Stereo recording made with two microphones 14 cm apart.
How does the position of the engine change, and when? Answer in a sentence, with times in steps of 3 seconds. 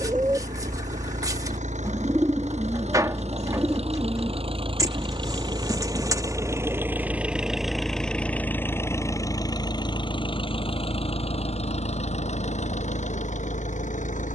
In this clip you hear the engine on the right from 0 s, in the centre from 6 s and on the left from 9 s.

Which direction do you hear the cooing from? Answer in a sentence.
In this clip you hear the cooing on the right.